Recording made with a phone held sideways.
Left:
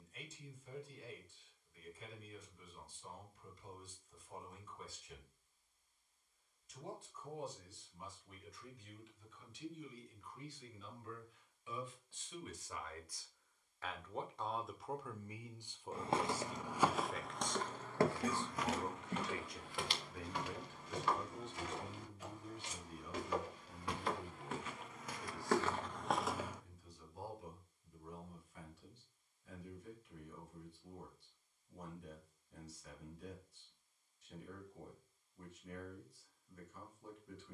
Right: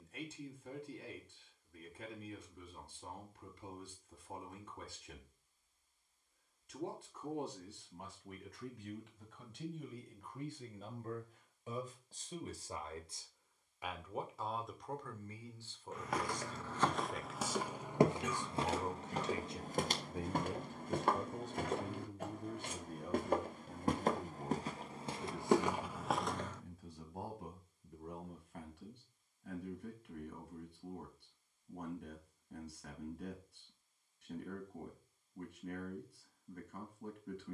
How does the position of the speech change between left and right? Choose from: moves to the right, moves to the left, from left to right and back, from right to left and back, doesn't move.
from right to left and back.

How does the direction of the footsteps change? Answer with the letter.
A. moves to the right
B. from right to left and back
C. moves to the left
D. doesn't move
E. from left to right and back
E.